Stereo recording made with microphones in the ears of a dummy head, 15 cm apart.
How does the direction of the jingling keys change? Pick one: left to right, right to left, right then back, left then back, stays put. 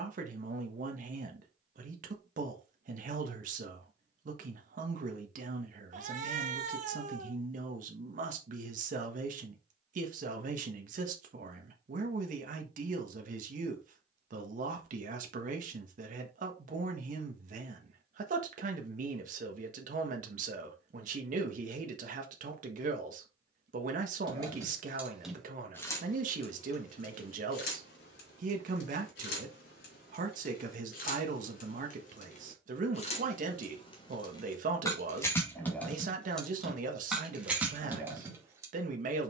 left then back.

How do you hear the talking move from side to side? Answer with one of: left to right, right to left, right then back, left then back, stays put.
stays put.